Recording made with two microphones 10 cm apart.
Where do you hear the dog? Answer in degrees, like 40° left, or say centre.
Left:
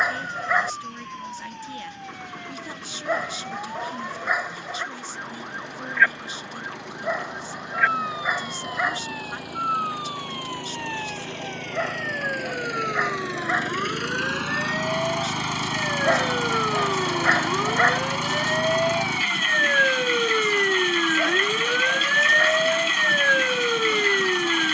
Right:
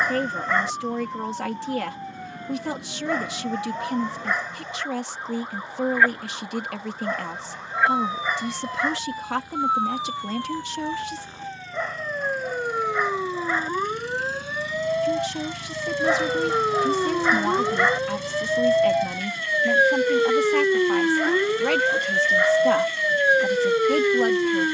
10° left.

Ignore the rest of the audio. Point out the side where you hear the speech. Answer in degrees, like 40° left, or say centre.
80° right.